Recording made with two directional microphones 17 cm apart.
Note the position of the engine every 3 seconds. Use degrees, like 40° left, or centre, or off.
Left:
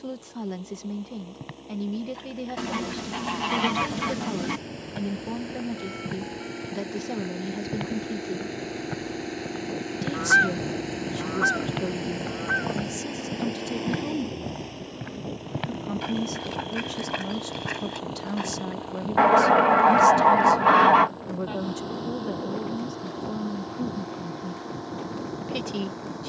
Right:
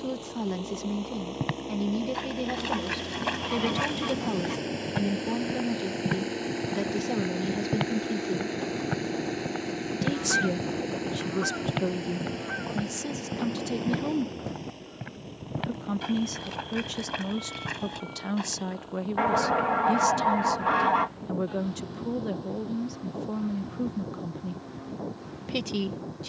50° right, 40° right, 20° right, 10° left, 20° left, 40° left, 50° left, 50° left, 60° left.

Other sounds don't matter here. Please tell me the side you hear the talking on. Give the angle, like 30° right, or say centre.
10° right.